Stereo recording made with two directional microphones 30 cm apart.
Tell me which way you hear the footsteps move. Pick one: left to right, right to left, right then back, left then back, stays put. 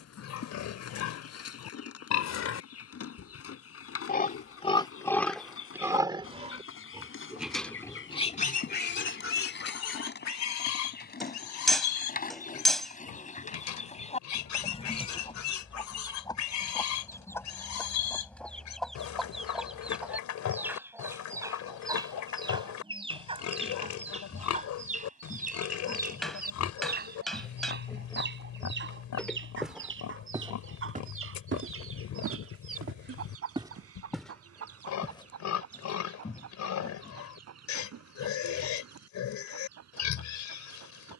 right then back.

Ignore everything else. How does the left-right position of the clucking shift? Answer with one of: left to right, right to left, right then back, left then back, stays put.
left to right.